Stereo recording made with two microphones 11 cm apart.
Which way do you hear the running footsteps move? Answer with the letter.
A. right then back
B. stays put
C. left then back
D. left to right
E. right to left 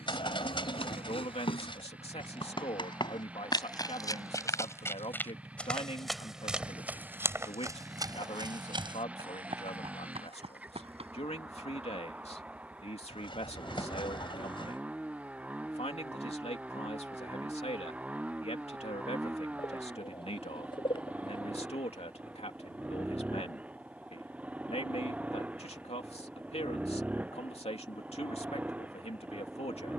D.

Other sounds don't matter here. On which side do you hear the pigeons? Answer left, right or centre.
left.